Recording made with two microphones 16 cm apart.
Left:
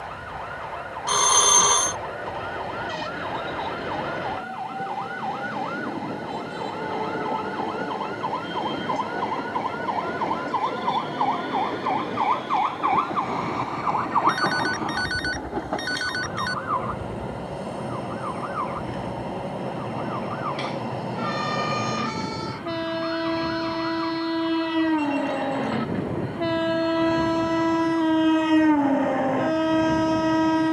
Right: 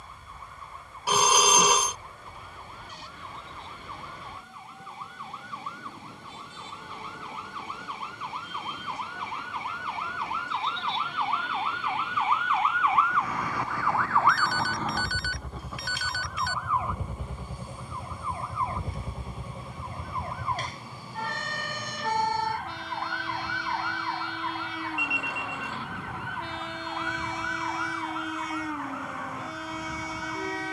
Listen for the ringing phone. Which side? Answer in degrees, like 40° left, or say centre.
10° right.